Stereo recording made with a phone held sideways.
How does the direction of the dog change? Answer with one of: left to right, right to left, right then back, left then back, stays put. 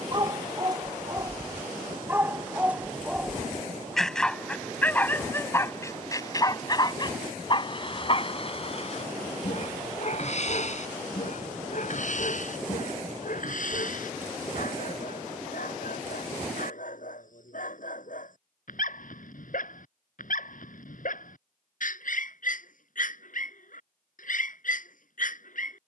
right to left.